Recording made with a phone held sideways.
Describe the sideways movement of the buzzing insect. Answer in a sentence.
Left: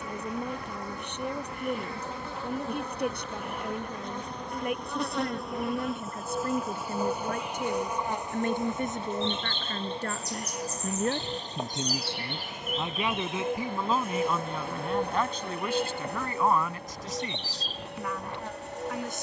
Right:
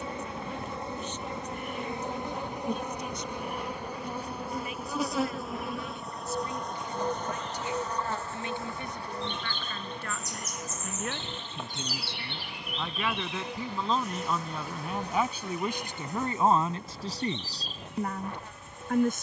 In this clip you hear the buzzing insect move to the left.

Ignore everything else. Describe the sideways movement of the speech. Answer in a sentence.
You can hear the speech move from left to right.